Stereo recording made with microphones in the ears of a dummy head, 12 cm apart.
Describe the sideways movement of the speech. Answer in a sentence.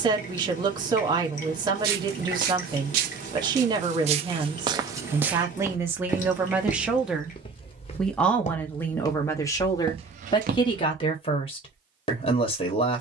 In this clip you hear the speech move from right to left.